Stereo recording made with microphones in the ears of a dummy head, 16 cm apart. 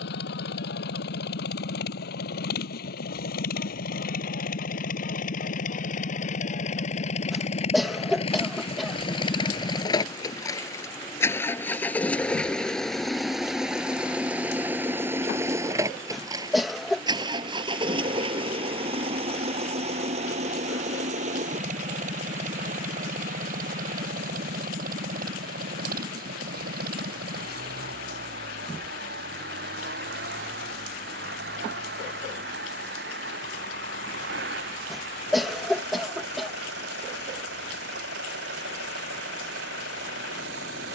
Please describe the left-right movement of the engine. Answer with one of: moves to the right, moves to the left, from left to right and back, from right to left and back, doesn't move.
moves to the right.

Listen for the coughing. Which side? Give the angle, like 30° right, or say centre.
centre.